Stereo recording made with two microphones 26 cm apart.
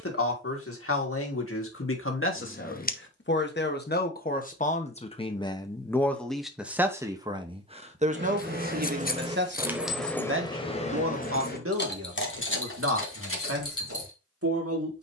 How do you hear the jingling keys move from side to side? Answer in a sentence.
You can hear the jingling keys go from the right side to the left.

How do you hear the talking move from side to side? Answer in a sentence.
You can hear the talking move to the right.